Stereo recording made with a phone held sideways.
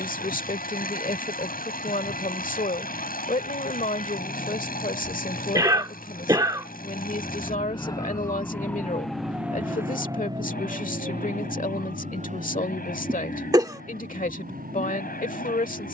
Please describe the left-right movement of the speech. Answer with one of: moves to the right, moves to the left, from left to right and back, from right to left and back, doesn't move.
doesn't move.